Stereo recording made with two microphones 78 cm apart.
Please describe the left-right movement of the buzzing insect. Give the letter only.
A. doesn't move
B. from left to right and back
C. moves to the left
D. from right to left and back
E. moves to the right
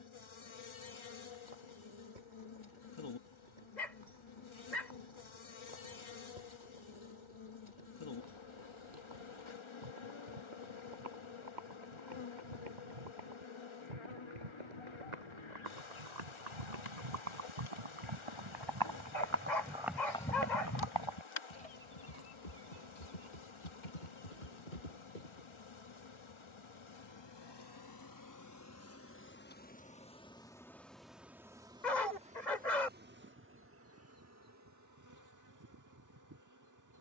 E.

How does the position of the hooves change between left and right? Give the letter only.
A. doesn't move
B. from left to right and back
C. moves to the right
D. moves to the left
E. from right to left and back
D.